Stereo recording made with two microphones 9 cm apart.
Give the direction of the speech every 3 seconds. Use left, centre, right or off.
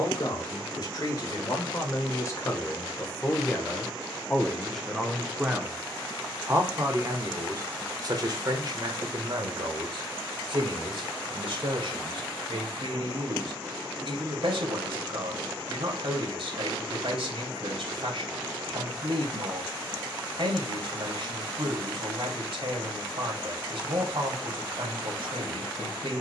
left, centre, right, right, right, right, right, right, right.